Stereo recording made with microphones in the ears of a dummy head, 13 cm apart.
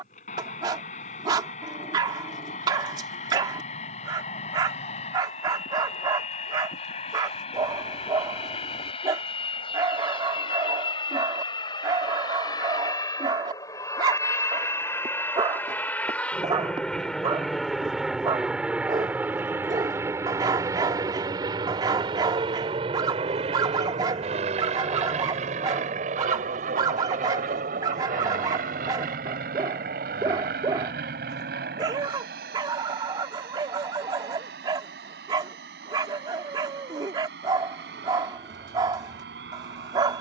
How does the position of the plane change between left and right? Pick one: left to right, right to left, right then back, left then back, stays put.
left to right.